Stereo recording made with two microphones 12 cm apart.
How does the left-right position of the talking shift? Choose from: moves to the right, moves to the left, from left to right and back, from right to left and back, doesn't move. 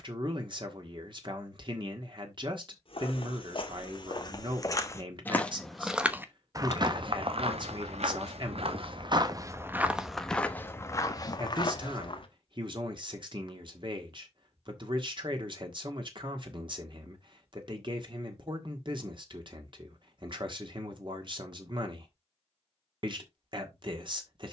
doesn't move.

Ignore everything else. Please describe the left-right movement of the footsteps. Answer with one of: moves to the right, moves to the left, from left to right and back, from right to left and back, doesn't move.
from left to right and back.